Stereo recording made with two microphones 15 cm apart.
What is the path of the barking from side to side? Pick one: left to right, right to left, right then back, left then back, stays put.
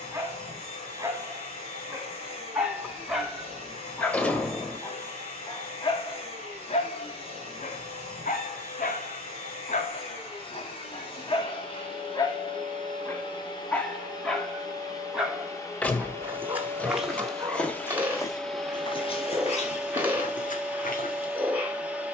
left then back.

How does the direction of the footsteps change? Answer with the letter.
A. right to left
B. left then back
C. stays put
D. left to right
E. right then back
A.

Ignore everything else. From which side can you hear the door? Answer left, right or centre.
centre.